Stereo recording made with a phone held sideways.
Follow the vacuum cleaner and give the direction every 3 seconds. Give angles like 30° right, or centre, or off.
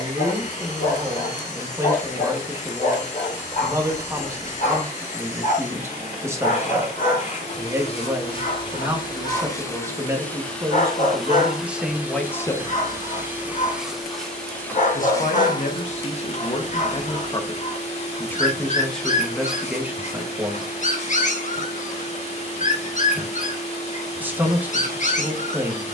50° left, 50° left, 40° left, 10° left, 10° right, 40° left, 40° left, 40° left, 40° left.